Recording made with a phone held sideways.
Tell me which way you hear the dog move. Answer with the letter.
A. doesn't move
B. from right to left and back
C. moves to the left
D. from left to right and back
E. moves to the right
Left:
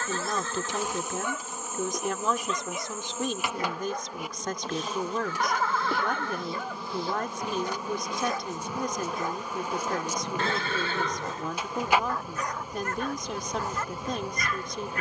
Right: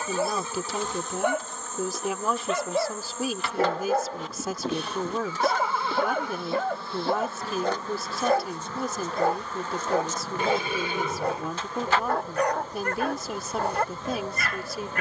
A.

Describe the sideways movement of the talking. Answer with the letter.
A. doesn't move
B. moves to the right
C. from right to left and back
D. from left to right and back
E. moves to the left
A.